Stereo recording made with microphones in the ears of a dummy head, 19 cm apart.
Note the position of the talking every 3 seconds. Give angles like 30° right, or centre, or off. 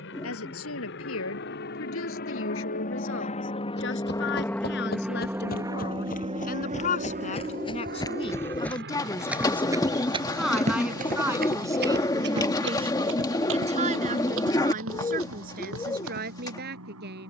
70° left, 60° left, 30° left, 10° right, 30° right, 50° right.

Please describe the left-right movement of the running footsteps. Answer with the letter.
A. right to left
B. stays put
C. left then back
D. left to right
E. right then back
D.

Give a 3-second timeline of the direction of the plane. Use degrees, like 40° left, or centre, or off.
60° left, 10° left, 40° right, 60° right, 70° right, 70° right.